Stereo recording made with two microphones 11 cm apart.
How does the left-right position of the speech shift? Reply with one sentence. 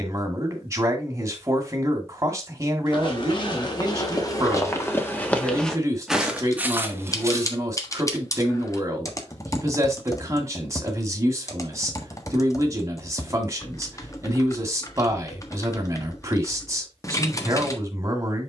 In this clip you hear the speech stay put.